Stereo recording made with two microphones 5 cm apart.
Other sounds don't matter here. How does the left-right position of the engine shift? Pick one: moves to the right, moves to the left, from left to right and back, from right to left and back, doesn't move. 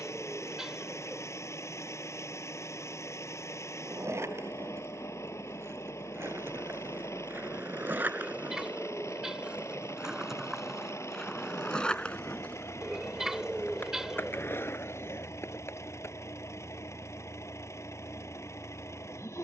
doesn't move.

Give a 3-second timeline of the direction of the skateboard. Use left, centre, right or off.
off, right, right, centre, left, left, off.